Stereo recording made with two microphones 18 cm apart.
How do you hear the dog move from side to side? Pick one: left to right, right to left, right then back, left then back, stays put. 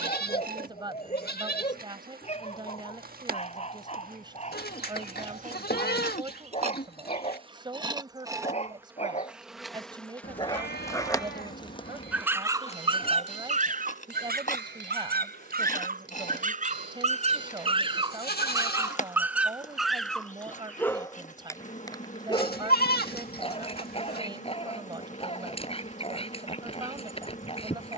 right then back.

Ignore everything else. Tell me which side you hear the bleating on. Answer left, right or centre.
left.